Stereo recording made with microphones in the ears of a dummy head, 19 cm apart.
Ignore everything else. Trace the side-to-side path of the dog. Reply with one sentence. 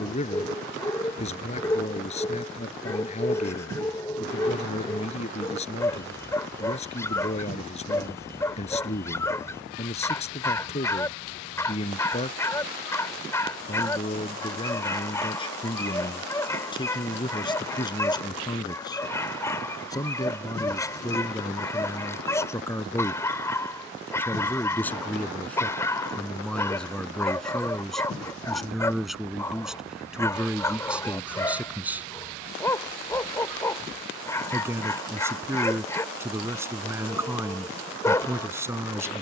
You can hear the dog stay in one place.